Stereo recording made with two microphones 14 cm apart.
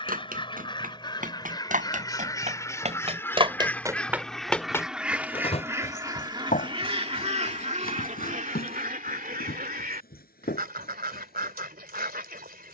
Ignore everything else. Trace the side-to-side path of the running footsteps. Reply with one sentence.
You can hear the running footsteps travel towards the left.